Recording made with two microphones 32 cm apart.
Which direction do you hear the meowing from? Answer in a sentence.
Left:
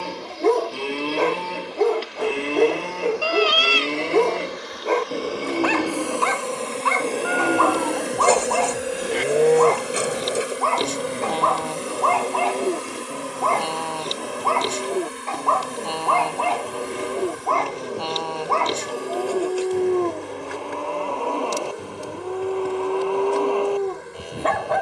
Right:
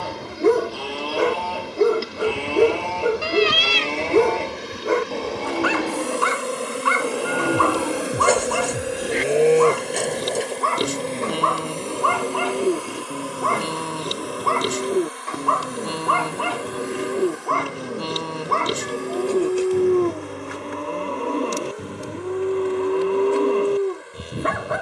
You can hear the meowing on the right.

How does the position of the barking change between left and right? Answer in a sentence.
You can hear the barking stay put.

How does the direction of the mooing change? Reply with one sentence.
You can hear the mooing move to the right.